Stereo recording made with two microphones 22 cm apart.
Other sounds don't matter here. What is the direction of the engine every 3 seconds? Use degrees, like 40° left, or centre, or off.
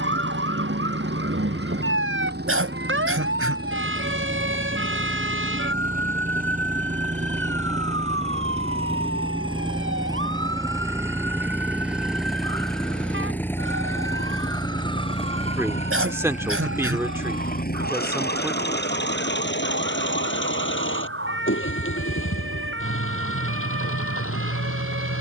50° right, 40° right, 30° right, 10° right, 10° left, 30° left, 50° left, 70° left, 70° left.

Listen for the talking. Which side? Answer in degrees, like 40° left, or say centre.
10° right.